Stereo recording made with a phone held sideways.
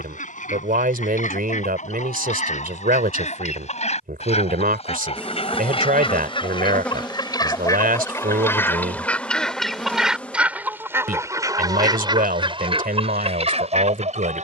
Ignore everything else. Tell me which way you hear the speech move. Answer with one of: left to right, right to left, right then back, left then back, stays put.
stays put.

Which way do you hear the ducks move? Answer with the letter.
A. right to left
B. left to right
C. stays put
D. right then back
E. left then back
B.